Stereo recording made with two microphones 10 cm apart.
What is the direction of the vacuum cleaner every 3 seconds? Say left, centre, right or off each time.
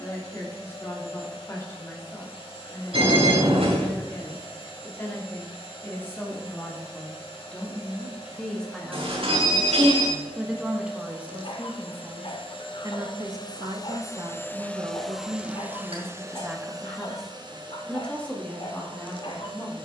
left, left, left, left, left, right, right.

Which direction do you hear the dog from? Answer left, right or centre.
left.